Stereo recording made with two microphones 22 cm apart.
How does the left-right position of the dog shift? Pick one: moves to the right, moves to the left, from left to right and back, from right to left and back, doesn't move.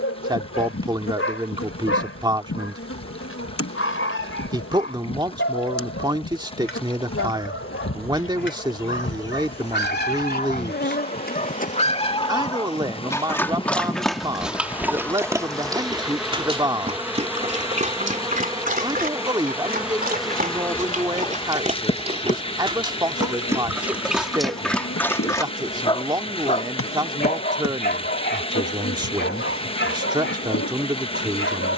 from left to right and back.